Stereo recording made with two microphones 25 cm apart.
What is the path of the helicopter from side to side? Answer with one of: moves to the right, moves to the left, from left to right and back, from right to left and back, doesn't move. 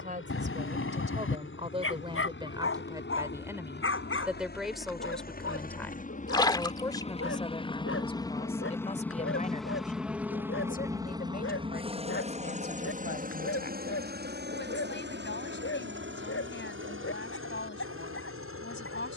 moves to the right.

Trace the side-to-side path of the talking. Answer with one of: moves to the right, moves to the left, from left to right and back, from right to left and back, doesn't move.
moves to the left.